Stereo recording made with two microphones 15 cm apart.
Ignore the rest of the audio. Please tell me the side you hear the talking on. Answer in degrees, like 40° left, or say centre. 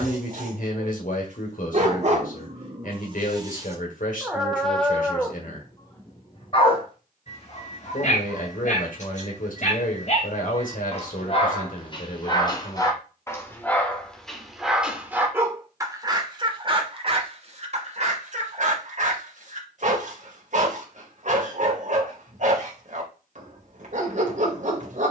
60° left.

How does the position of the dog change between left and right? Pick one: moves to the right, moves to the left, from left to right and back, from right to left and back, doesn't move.
from right to left and back.